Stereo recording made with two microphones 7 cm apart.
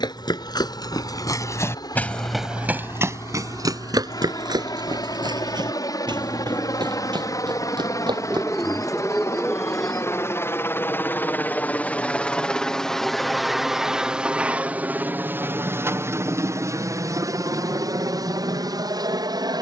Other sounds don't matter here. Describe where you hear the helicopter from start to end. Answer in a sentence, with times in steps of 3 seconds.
You can hear the helicopter on the left from 0 s, in the centre from 12 s and on the right from 15 s.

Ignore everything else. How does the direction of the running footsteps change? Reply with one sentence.
You can hear the running footsteps move to the right.